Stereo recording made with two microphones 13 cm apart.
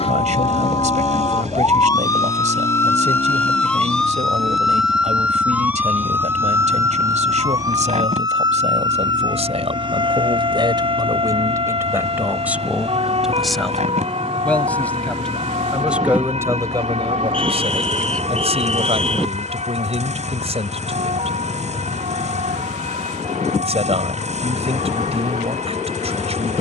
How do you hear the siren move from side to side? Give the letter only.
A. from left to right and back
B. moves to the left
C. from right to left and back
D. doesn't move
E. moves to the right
E.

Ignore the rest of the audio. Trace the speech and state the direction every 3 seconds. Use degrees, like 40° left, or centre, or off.
60° right, 60° right, 60° right, 40° right, centre, 30° right, 50° right, 50° right, 50° right.